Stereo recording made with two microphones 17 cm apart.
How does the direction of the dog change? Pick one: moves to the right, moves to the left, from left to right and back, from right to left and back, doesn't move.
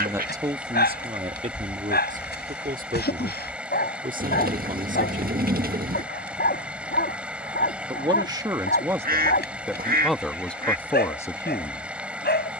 doesn't move.